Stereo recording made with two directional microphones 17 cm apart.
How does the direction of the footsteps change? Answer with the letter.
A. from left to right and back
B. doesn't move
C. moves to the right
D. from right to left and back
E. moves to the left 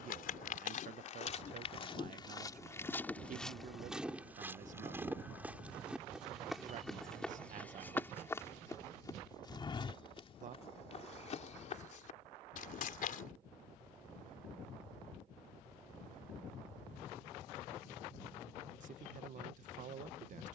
A.